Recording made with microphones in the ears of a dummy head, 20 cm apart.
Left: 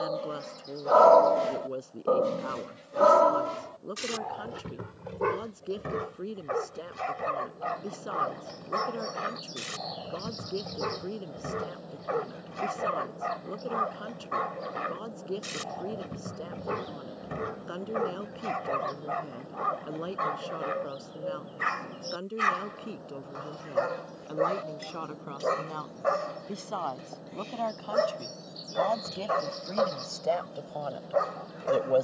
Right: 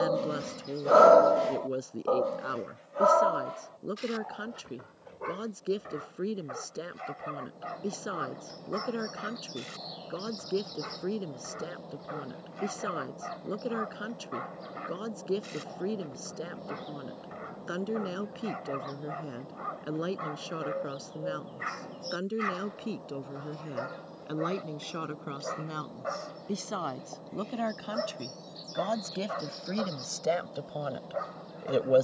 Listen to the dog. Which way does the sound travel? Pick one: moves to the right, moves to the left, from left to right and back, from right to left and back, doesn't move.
moves to the left.